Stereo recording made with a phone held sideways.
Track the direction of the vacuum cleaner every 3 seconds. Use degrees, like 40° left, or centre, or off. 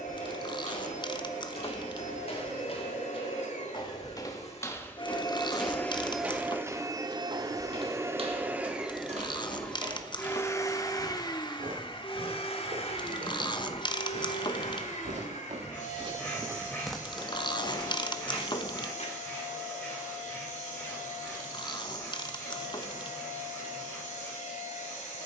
70° left, 50° left, 20° right, 20° left, 50° left, 70° left, 70° left, 70° left, 70° left.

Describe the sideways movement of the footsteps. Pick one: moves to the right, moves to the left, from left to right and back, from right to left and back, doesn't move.
from left to right and back.